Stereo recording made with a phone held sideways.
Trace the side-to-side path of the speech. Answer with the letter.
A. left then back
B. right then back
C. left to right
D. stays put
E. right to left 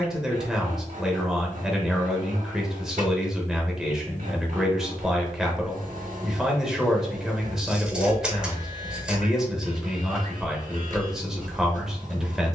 D.